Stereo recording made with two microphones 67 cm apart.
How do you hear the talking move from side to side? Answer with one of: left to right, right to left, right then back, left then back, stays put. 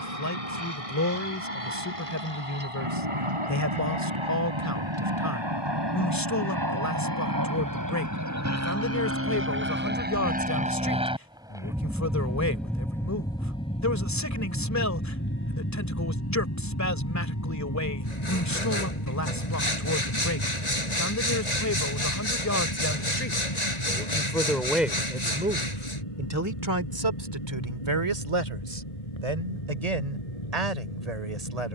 left to right.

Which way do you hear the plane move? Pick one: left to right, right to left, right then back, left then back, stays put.
right to left.